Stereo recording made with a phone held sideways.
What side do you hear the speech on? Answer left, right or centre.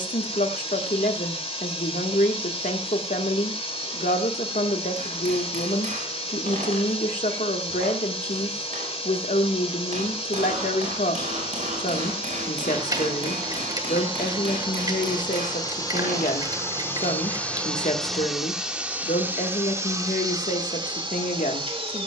left.